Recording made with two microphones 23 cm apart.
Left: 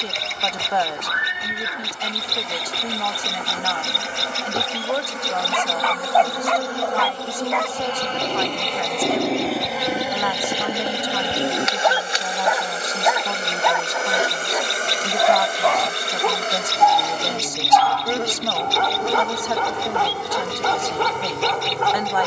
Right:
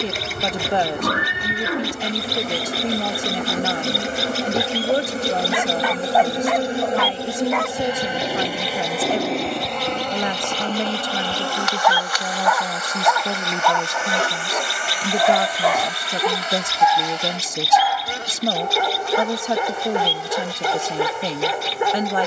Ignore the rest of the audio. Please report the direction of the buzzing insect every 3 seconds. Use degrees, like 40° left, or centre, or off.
50° right, 40° right, 20° right, 10° left, 30° left, 50° left, 60° left, 60° left.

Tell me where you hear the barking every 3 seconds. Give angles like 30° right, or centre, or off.
20° right, 10° right, centre, 20° left, 10° left, 10° right, 20° right, 20° right.